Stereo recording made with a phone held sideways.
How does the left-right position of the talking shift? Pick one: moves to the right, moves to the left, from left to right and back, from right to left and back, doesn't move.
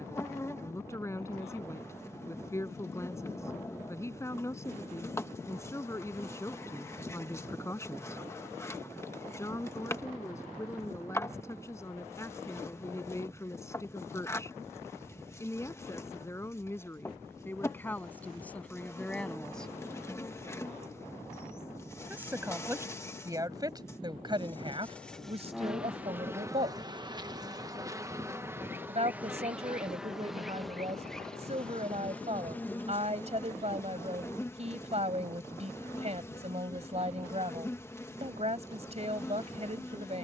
moves to the right.